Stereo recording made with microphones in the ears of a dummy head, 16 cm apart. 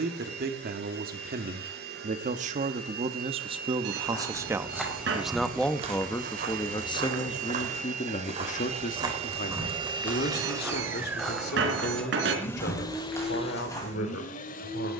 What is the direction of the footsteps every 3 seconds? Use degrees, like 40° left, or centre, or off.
off, centre, 40° right, 10° right, 20° left.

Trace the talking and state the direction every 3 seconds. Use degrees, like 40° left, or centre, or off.
50° right, 20° right, 30° left, 60° left, 70° left.